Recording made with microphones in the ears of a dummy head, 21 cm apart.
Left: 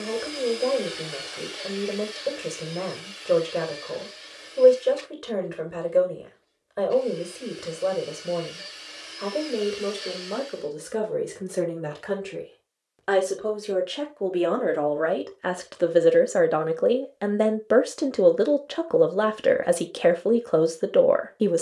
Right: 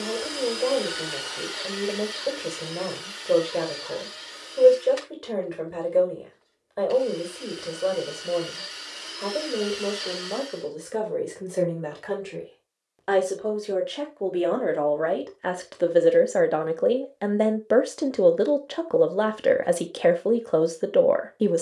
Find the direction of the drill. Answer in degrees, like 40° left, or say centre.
80° right.